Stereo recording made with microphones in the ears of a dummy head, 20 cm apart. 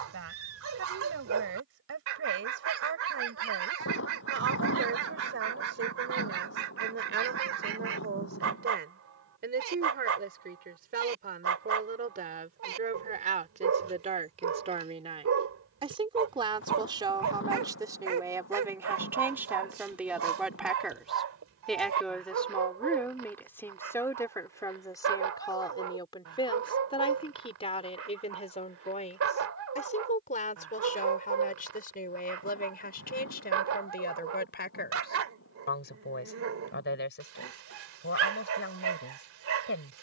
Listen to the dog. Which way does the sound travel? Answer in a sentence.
In this clip you hear the dog stay put.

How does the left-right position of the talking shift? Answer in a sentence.
You can hear the talking travel towards the left.